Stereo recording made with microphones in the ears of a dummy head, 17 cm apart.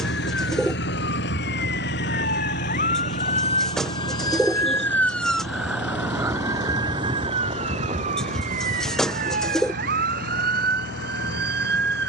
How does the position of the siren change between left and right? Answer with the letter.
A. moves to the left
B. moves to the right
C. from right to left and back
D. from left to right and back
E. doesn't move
B.